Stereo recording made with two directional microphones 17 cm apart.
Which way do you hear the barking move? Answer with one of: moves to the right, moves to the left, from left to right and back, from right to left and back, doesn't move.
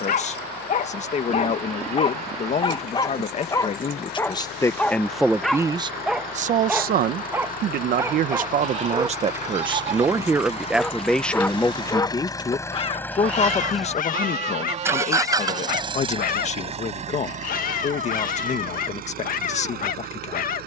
from left to right and back.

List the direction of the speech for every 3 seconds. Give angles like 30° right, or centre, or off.
40° left, 10° left, 50° right, 10° right, 30° left, 40° left, 40° left.